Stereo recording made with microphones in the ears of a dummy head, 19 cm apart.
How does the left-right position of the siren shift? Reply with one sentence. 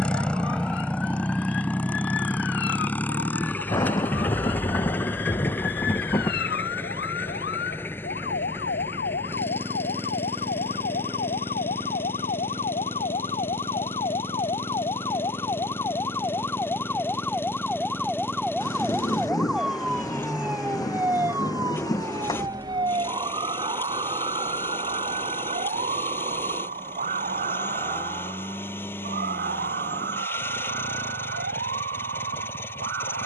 In this clip you hear the siren go from the left side to the right.